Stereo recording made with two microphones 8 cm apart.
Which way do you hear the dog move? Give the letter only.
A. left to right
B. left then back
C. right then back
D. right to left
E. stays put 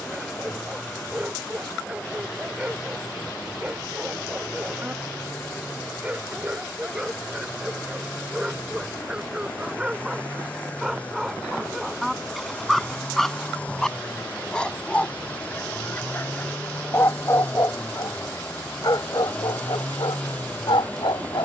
D.